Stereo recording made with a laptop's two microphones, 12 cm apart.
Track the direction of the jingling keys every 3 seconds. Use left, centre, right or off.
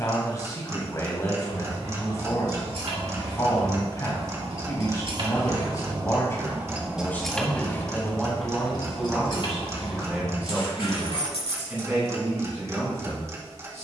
right, right, centre, left, off.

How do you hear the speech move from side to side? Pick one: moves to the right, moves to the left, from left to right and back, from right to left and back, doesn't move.
moves to the right.